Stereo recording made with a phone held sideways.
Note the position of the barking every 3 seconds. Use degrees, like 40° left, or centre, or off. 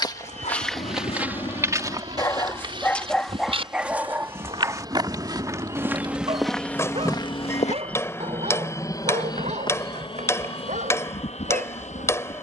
30° left, 20° right, 50° right, 60° right.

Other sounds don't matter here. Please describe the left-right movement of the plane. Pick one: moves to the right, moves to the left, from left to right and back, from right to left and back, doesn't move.
moves to the left.